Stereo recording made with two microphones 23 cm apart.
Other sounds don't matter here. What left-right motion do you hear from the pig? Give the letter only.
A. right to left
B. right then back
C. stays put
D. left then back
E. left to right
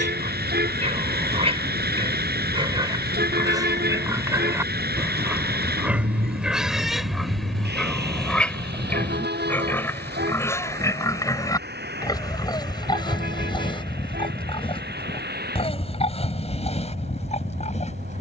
A.